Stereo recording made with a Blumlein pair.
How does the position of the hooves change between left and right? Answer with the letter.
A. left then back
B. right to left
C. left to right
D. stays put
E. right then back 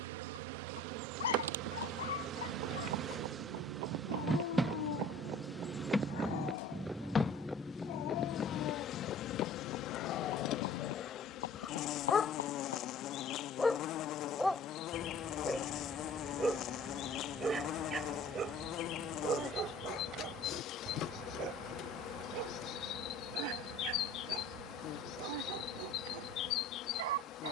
B.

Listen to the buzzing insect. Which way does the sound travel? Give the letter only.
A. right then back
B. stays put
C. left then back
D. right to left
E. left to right
D.